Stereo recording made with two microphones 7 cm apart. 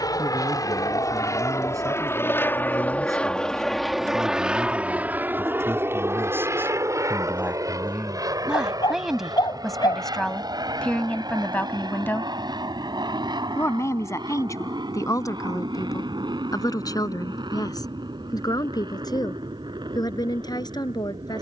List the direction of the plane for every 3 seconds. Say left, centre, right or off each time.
left, centre, right, right, right, right, right.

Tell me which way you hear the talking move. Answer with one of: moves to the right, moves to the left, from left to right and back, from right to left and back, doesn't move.
moves to the left.